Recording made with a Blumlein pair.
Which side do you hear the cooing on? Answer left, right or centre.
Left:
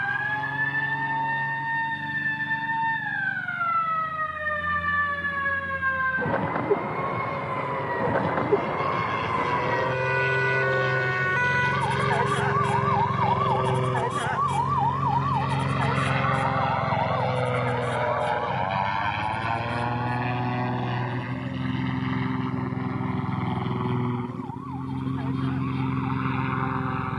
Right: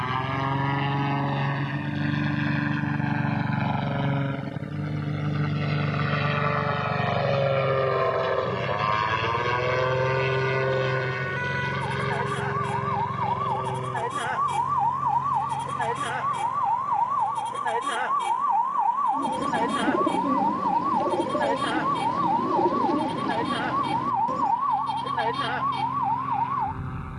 right.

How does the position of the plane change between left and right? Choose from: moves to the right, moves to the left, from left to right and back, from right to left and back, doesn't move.
moves to the left.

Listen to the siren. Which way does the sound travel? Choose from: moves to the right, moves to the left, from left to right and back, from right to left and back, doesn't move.
moves to the right.